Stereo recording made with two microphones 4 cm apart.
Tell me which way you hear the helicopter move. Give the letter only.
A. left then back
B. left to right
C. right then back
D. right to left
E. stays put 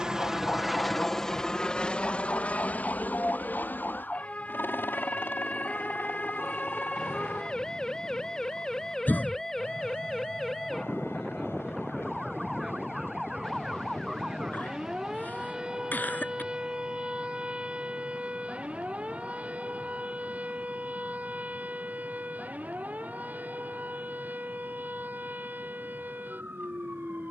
D.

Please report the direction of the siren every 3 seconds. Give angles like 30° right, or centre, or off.
40° left, 30° left, 20° left, centre, 10° right, 20° right, 30° right, 40° right, 50° right.